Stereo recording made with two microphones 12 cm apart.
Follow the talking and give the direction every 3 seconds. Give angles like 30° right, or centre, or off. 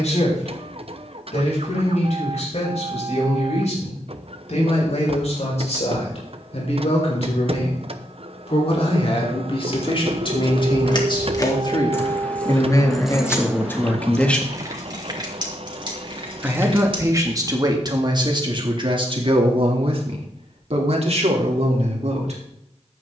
70° left, 60° left, 60° left, 40° left, 20° left, 30° right, 50° right, 60° right.